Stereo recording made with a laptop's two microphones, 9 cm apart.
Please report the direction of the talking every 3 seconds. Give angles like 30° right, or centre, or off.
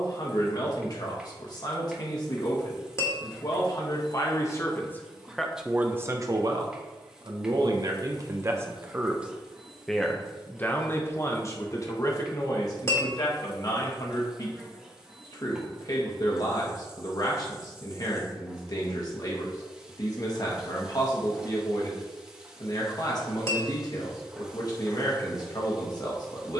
50° left, 30° left, 40° right, 20° left, 50° left, 50° left, 50° left, 50° left, 50° left.